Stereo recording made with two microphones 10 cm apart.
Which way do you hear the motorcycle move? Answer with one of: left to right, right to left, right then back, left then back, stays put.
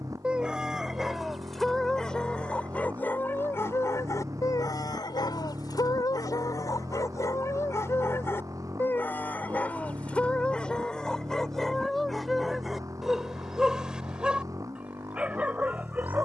stays put.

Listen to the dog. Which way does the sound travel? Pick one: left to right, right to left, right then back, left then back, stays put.
left then back.